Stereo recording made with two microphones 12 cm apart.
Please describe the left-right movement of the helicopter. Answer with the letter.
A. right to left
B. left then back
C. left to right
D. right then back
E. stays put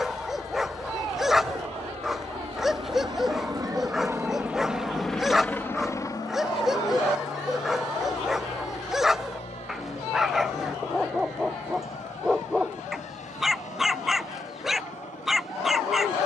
A.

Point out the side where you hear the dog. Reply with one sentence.
In this clip you hear the dog in the centre.